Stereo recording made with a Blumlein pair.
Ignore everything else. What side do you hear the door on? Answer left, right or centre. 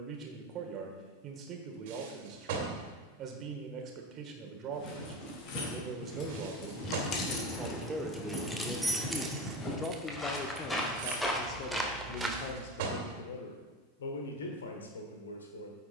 right.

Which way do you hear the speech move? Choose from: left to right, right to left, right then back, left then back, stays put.
right to left.